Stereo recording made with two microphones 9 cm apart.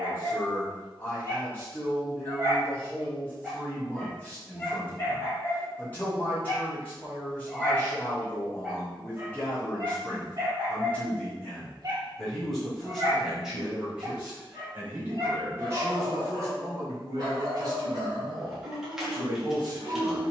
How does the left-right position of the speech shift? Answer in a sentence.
In this clip you hear the speech move to the right.